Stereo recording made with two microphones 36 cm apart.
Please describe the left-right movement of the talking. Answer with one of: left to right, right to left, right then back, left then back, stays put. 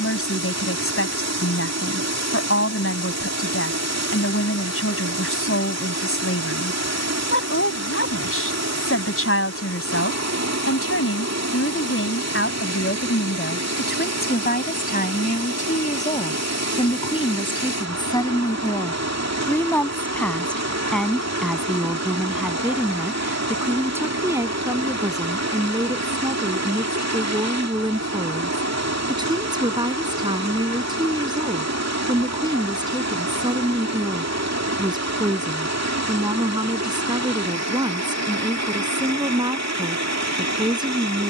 left to right.